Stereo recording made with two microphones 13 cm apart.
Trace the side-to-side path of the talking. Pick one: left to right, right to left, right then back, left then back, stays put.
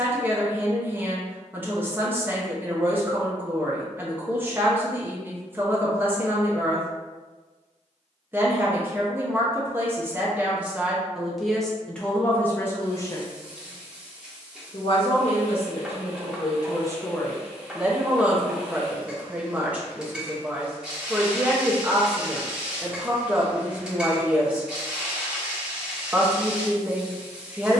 left then back.